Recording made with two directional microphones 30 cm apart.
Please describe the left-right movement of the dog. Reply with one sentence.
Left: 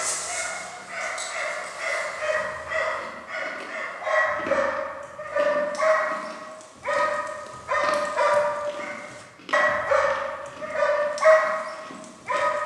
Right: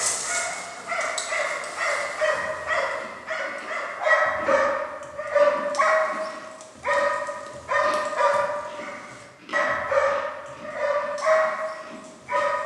You can hear the dog move to the left.